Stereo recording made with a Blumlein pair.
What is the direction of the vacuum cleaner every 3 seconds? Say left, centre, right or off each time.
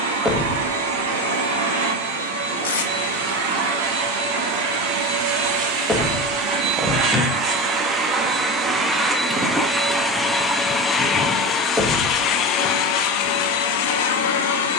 right, right, right, centre, left.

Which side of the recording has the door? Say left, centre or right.
centre.